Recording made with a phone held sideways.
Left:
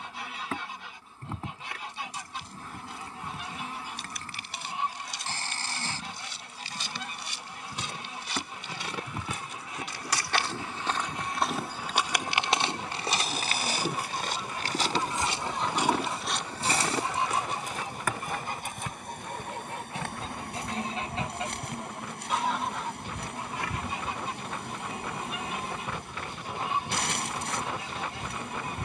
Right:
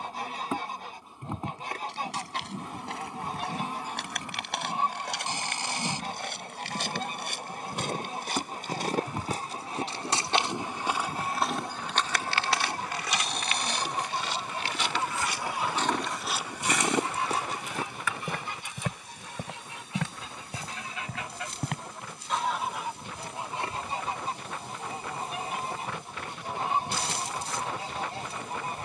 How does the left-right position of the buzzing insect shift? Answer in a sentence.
In this clip you hear the buzzing insect travel towards the left.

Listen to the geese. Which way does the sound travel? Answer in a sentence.
You can hear the geese go left and come back.